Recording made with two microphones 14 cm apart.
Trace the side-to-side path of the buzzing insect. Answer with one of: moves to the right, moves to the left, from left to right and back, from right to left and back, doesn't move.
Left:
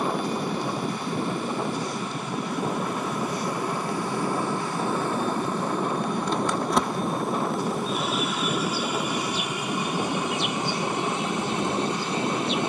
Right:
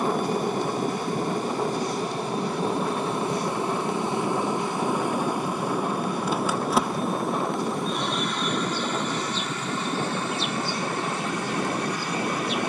moves to the left.